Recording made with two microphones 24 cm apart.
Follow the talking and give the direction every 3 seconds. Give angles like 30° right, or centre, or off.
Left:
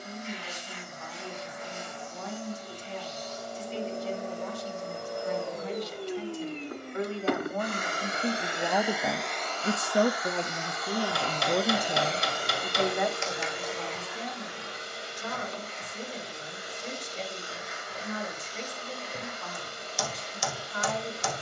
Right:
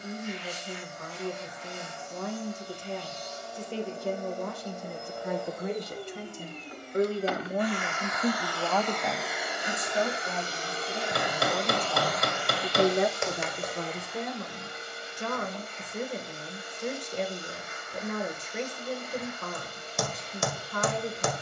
60° right, 60° right, 30° right, 50° left, 40° right, 60° right, 60° right.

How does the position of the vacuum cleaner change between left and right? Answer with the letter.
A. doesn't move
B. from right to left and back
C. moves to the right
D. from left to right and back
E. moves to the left
D.